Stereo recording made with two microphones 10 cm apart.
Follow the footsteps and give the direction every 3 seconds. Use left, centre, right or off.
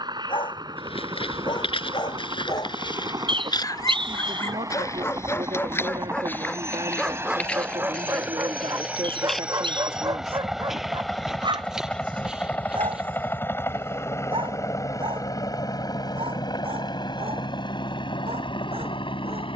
left, left, centre, centre, centre, off, off.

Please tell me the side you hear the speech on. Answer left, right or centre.
right.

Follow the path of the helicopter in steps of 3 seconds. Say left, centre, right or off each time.
right, right, right, centre, left, left, left.